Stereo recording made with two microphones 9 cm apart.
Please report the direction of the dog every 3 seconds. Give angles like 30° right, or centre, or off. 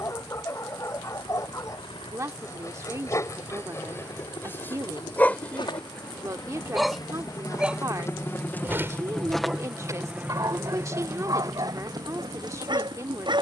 40° left, 20° left, 10° right, 40° right, 60° right.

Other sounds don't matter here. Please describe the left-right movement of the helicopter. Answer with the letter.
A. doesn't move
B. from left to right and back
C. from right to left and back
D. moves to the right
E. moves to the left
D.